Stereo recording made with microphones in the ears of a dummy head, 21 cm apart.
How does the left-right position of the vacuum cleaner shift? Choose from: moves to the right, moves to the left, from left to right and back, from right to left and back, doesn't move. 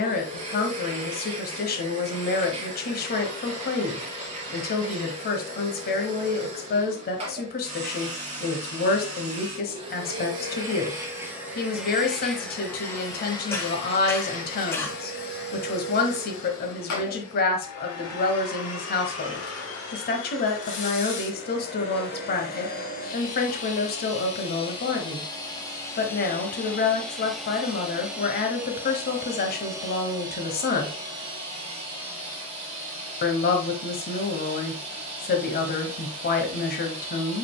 from right to left and back.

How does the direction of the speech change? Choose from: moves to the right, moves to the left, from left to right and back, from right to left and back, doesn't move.
doesn't move.